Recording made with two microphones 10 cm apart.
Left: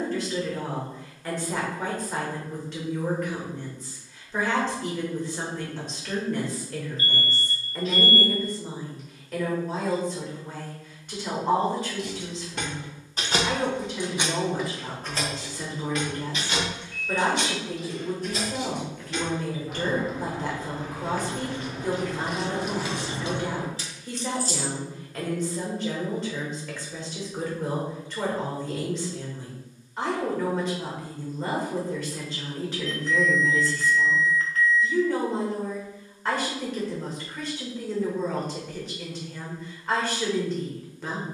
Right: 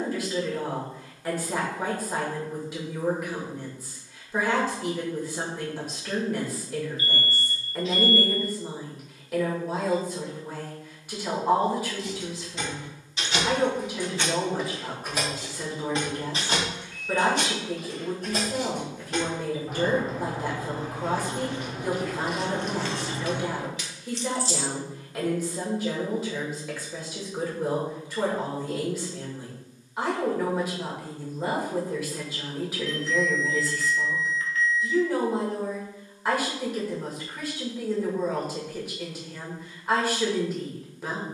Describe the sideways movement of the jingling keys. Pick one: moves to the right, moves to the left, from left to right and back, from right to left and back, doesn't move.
from left to right and back.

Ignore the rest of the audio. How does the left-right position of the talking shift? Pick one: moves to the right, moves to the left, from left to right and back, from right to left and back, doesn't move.
doesn't move.